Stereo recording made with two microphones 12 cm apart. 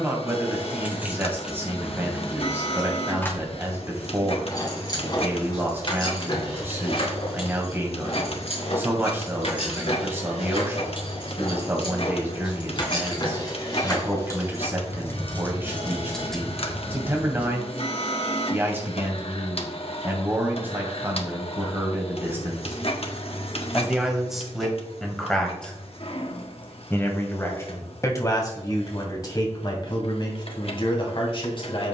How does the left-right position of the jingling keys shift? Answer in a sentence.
In this clip you hear the jingling keys go left and come back.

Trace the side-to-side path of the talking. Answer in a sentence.
You can hear the talking travel towards the left.